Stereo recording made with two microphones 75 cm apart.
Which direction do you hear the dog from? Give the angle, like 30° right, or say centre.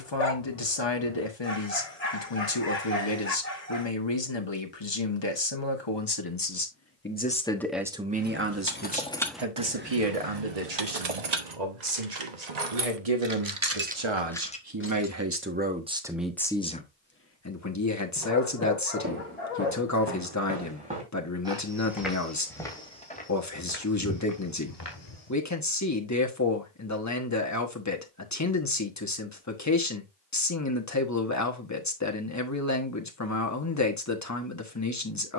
50° left.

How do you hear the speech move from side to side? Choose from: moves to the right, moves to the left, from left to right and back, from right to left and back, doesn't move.
from left to right and back.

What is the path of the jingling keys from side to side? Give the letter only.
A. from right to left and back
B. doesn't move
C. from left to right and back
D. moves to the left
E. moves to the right
C.